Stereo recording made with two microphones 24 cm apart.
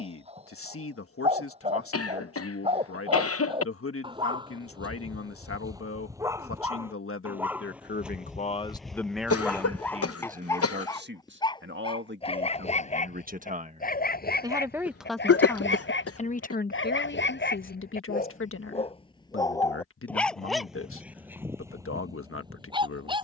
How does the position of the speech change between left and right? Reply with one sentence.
You can hear the speech go right and come back.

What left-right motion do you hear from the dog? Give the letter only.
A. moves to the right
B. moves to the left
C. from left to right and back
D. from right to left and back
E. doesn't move
D.